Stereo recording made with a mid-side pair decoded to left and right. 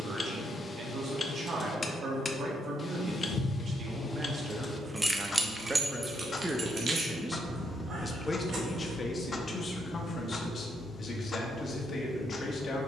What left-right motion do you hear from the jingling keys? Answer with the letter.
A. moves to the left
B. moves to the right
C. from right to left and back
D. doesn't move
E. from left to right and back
B.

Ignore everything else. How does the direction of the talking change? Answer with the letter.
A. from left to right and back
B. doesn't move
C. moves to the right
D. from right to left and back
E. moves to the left
E.